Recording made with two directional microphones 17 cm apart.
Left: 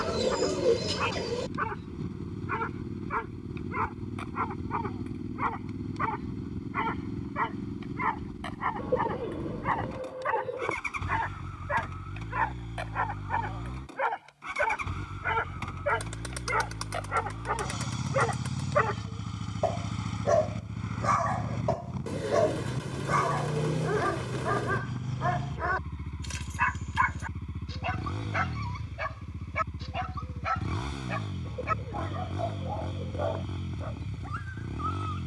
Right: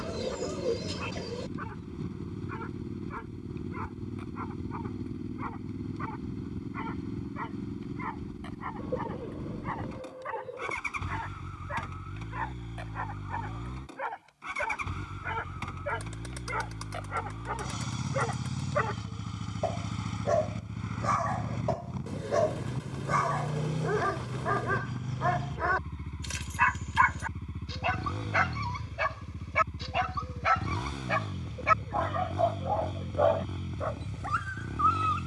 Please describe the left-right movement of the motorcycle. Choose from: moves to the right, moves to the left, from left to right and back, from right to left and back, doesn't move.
doesn't move.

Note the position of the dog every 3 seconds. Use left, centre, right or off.
left, left, left, left, left, left, left, centre, centre, right, right, right.